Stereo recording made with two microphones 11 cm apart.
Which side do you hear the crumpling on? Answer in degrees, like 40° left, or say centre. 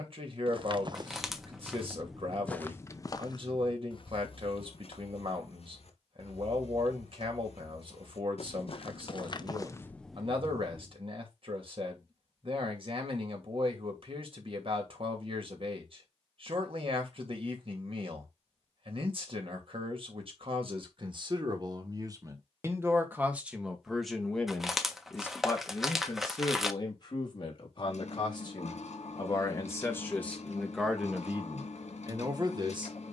centre.